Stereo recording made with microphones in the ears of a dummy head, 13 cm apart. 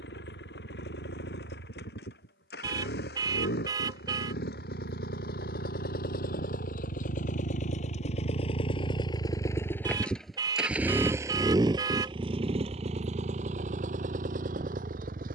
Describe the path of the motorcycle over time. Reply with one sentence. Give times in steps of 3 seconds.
You can hear the motorcycle on the left from 0 s, in the centre from 9 s and on the right from 12 s.